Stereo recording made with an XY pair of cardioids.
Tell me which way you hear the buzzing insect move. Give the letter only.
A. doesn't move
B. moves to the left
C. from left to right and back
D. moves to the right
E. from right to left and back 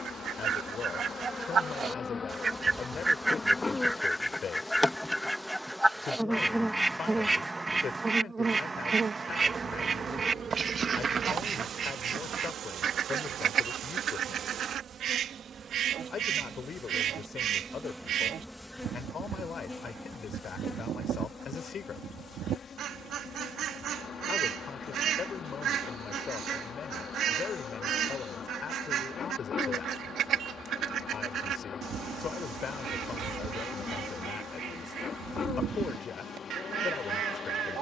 C.